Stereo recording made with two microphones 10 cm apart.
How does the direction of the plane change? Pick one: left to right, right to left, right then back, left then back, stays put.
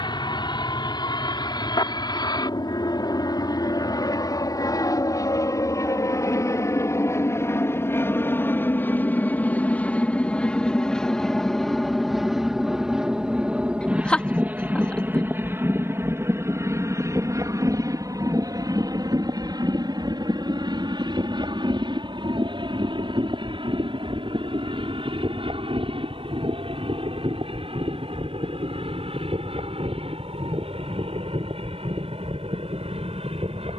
left to right.